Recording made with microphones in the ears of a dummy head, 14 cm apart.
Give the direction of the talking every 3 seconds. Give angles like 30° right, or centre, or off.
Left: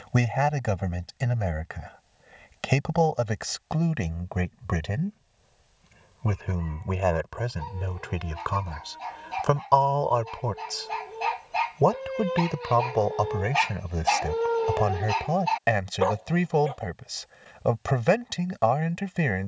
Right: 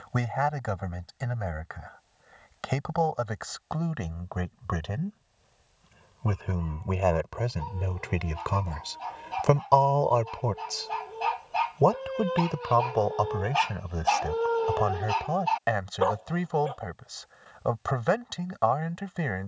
20° left, 20° left, centre, 10° right, 10° left, 20° left, 20° left.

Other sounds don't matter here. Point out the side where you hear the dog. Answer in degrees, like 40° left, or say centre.
10° left.